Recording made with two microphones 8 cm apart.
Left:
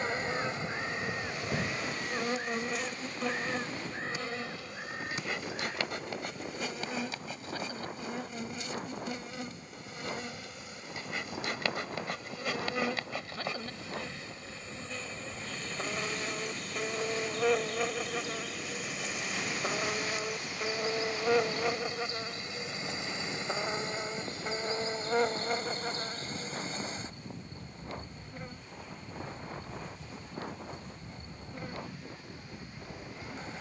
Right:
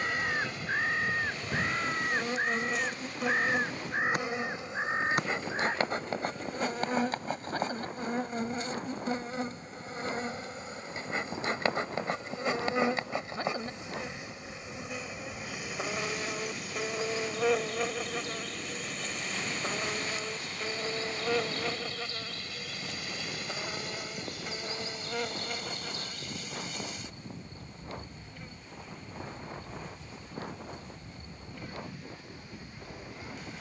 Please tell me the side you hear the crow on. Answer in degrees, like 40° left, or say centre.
50° right.